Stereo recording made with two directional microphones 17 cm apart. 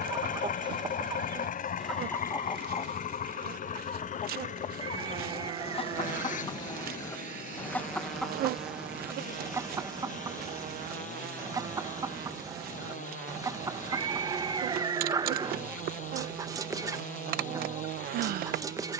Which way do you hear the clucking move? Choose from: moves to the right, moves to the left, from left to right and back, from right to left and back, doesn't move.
from right to left and back.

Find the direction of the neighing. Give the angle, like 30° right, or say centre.
30° right.